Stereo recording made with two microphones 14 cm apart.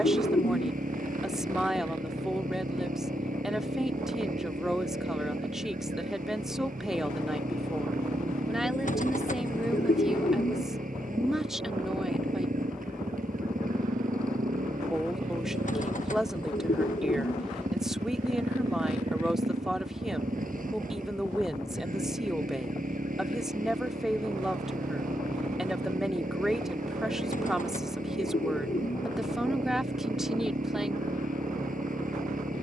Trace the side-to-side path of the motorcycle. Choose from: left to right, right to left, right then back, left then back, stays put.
stays put.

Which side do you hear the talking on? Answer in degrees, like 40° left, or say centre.
centre.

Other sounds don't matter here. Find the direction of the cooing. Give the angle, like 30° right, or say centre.
60° left.